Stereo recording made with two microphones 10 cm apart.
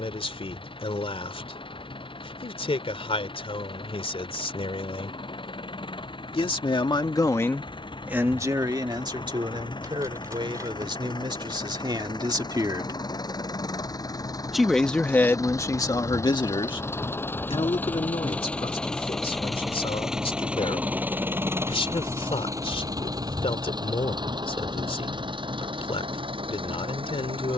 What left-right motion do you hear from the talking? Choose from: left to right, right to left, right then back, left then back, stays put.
right then back.